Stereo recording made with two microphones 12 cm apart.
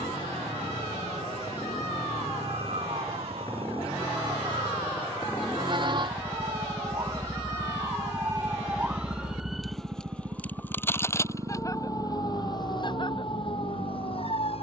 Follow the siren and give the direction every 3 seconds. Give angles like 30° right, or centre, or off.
60° right, 50° right, 30° right, 10° left, 40° left.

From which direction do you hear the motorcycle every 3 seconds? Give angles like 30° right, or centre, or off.
40° left, 30° left, centre, 20° right, 50° right.